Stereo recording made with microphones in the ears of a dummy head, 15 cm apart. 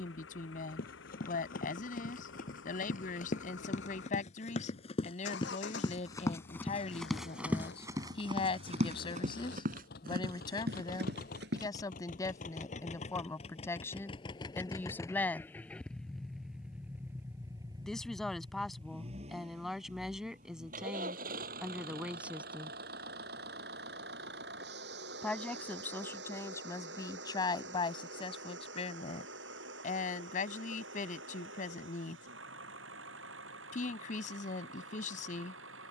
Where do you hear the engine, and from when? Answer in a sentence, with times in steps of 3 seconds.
You can hear the engine on the left from 0 s, in the centre from 15 s and on the right from 18 s.